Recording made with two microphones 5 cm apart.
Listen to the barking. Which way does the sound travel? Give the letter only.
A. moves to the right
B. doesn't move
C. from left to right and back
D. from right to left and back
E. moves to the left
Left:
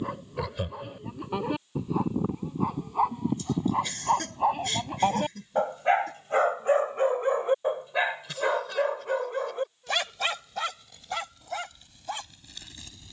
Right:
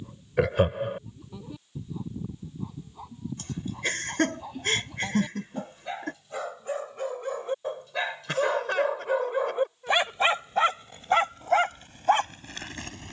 A.